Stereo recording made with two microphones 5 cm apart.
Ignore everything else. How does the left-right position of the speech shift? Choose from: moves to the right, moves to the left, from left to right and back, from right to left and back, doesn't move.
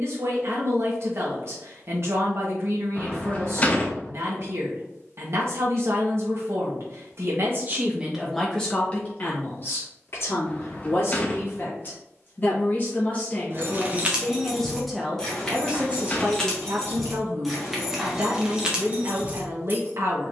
from right to left and back.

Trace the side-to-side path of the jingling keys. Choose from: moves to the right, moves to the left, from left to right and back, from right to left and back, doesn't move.
from right to left and back.